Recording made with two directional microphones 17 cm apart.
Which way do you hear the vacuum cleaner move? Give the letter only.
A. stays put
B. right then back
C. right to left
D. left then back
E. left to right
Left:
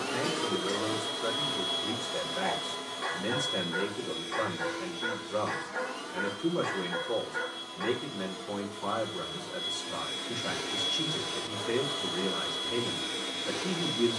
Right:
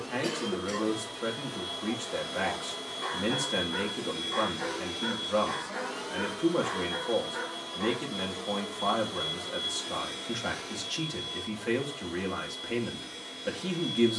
B.